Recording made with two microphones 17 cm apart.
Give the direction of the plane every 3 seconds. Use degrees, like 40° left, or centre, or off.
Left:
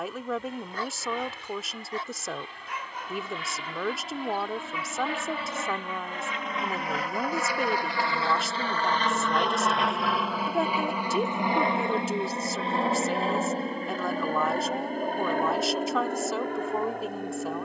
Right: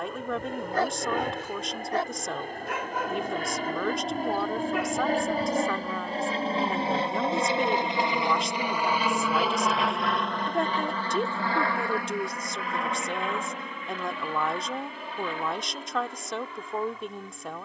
60° right, 50° right, 20° right, 10° left, 30° left, 50° left.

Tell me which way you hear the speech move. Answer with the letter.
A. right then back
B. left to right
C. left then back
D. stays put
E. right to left
D.